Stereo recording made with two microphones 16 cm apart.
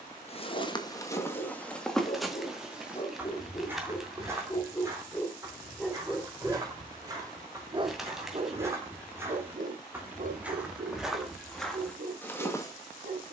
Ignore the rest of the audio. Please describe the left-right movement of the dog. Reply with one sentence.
In this clip you hear the dog move to the right.